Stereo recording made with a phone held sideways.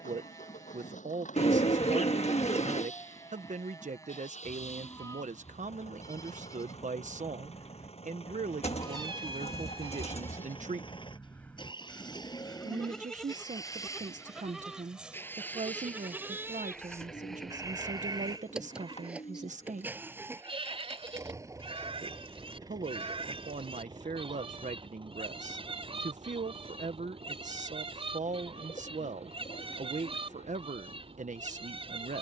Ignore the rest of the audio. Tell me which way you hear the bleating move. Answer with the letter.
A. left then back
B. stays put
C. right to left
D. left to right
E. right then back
D.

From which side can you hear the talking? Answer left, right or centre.
right.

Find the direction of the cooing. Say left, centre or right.
left.